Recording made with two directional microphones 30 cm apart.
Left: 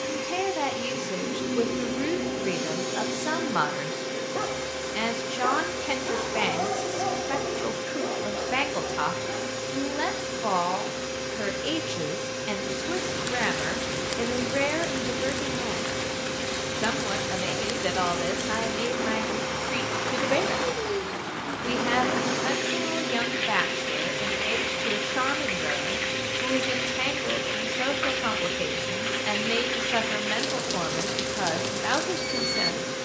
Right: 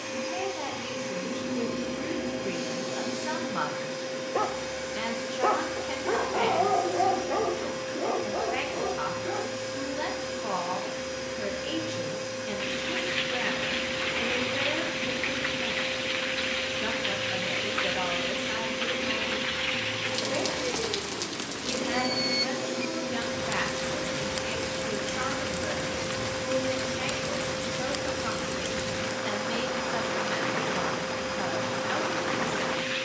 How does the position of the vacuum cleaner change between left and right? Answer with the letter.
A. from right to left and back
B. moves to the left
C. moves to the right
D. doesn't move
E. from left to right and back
D.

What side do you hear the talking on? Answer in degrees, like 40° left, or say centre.
40° left.